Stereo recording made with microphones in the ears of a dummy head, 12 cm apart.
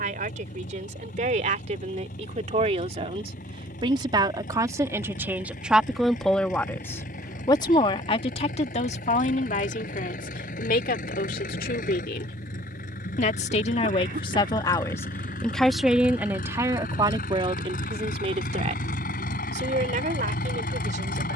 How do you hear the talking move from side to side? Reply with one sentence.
In this clip you hear the talking move from right to left and back again.